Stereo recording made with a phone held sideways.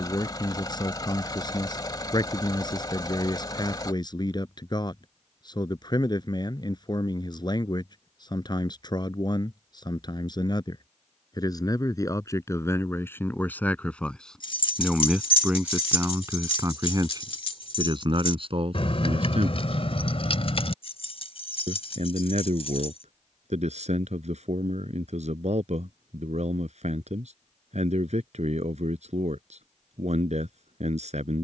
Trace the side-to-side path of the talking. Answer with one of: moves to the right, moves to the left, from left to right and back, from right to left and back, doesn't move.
moves to the right.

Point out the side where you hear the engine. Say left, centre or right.
left.